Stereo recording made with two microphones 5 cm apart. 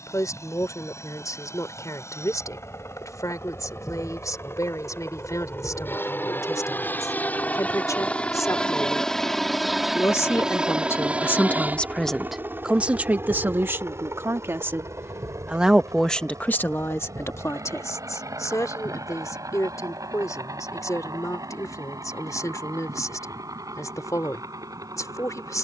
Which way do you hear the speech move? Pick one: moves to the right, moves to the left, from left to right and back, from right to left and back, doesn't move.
from left to right and back.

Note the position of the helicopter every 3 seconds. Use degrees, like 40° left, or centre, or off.
60° left, 50° left, 30° left, 10° right, 40° right, 60° right, 70° right, 70° right, 80° right.